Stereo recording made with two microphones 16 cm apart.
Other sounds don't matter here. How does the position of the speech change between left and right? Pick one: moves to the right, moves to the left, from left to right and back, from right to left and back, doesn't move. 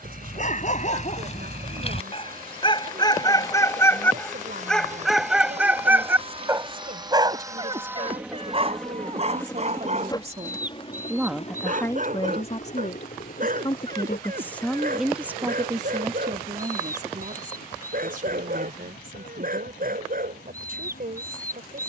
from right to left and back.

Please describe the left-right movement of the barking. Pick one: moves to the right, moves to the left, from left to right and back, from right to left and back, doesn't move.
moves to the right.